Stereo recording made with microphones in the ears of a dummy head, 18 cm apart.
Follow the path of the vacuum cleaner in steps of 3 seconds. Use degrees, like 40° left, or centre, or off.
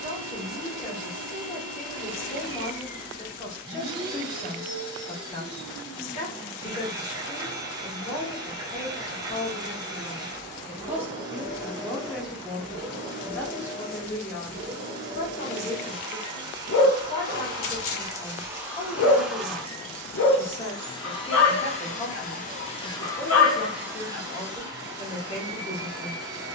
20° right, 20° right, 20° right, 20° right, 20° right, 20° right, centre, 20° left, 20° right.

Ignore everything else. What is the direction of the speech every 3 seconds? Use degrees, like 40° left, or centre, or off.
30° left, 30° left, 30° left, 10° left, 10° left, 30° left, 30° left, 30° left, 30° left.